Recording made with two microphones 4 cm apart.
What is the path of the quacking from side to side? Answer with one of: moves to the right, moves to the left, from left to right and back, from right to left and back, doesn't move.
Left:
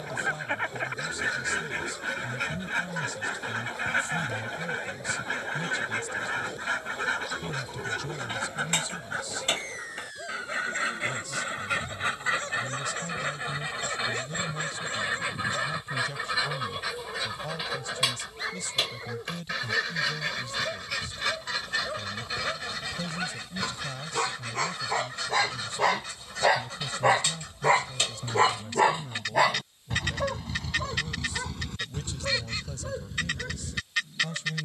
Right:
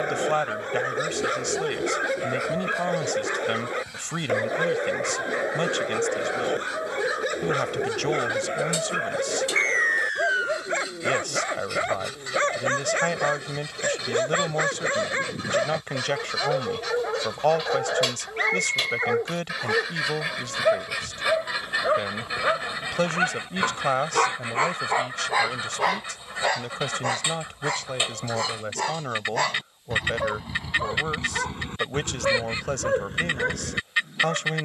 moves to the right.